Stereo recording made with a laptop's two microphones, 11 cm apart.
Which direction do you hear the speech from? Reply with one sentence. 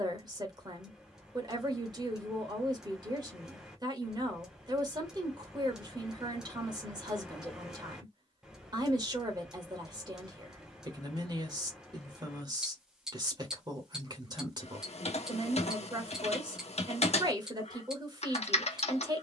In this clip you hear the speech on the right.